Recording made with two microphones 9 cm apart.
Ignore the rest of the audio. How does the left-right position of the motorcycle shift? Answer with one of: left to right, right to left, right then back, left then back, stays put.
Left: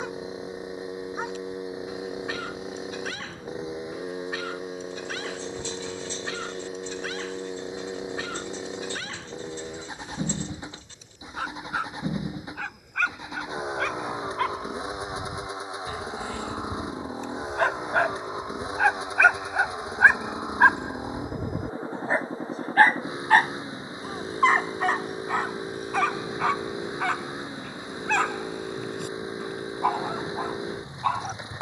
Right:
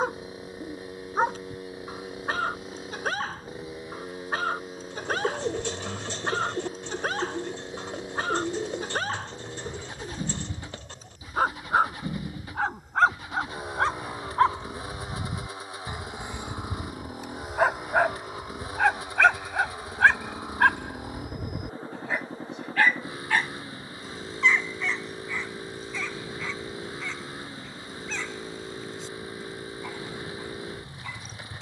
stays put.